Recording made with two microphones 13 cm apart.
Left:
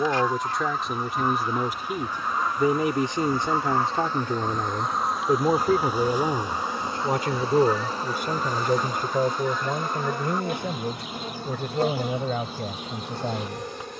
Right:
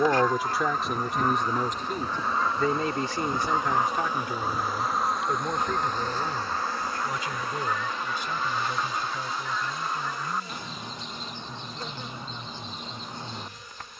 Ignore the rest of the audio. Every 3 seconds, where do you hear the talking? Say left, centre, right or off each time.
centre, left, left, left, left.